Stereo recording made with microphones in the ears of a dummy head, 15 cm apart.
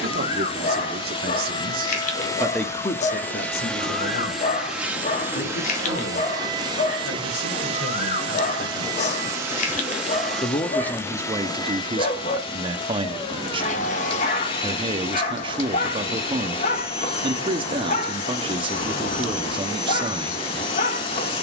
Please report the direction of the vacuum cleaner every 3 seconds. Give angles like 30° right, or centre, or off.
30° left, centre, 30° right, centre, 30° left, 30° left, 30° left.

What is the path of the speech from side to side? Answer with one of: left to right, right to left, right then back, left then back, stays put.
left then back.